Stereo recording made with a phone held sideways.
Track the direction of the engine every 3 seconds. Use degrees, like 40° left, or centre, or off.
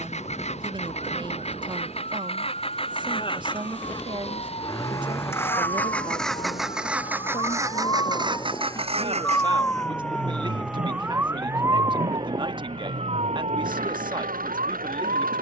50° left, 30° left, 20° right, 60° right, 80° right.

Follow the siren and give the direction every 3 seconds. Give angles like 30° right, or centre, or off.
50° left, 50° left, 30° left, centre, 50° right.